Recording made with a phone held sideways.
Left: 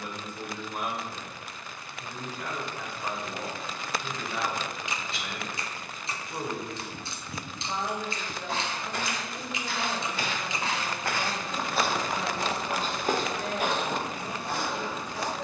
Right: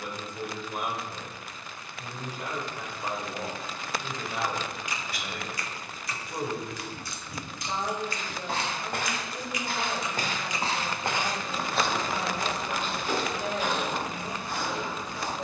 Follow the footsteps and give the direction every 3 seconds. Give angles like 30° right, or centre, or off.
off, off, 60° right, 30° right, 50° left.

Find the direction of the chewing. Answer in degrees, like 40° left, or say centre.
20° left.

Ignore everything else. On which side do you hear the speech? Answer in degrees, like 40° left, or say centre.
10° right.